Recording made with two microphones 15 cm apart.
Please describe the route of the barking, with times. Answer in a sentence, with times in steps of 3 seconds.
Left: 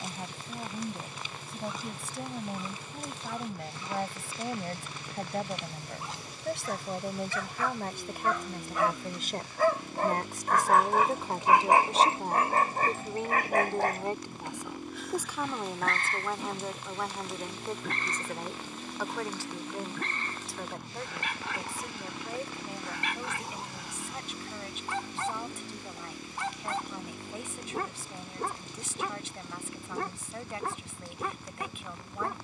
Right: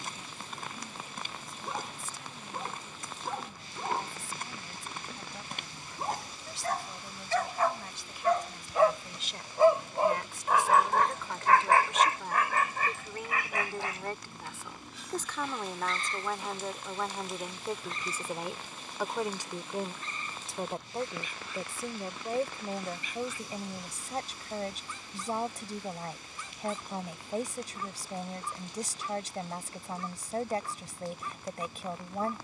You can hear the barking on the right from 0 s, in the centre from 9 s and on the left from 12 s.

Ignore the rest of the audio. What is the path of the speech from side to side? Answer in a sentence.
You can hear the speech move to the right.